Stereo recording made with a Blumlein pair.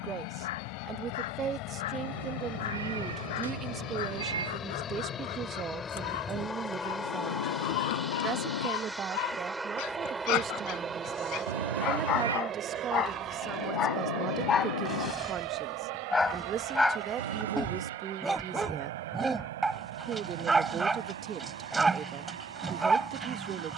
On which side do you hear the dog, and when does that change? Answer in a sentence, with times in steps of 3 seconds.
You can hear the dog on the left from 0 s and in the centre from 15 s.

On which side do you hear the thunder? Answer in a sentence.
You can hear the thunder on the left.